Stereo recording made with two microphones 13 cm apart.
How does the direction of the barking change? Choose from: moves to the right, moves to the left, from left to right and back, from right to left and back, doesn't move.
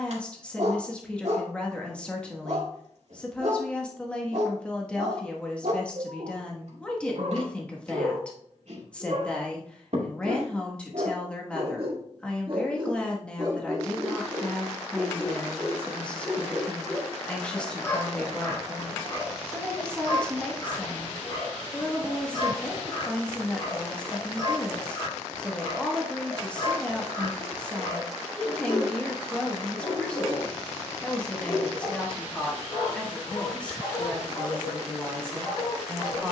moves to the left.